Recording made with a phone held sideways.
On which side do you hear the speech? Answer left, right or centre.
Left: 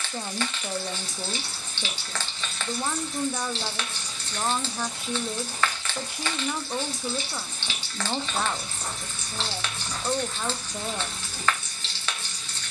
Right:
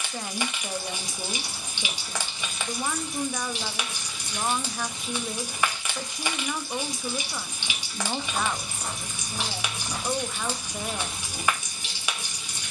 centre.